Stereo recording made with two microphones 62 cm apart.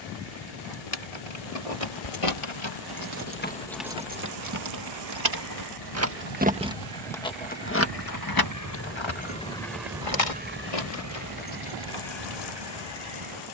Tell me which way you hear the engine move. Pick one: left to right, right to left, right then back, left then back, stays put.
left to right.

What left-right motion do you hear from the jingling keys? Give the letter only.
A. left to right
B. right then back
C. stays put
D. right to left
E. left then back
B.